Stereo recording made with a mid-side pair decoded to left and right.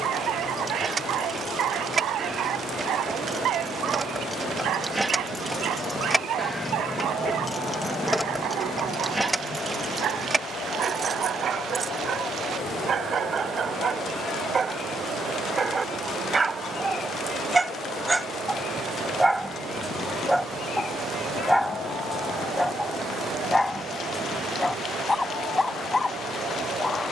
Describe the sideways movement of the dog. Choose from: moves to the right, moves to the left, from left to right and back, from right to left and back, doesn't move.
moves to the left.